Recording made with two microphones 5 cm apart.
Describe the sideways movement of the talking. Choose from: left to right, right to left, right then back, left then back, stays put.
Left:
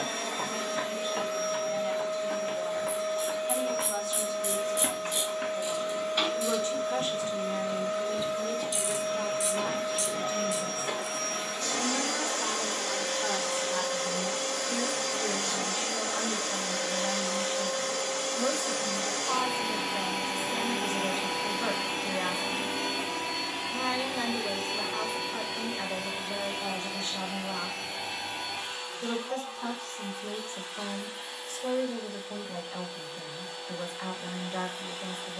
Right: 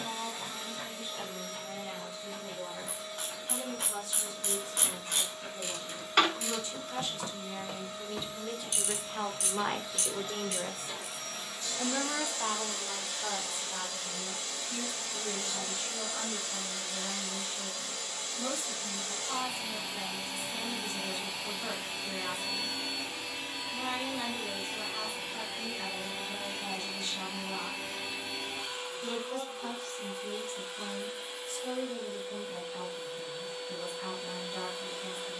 right then back.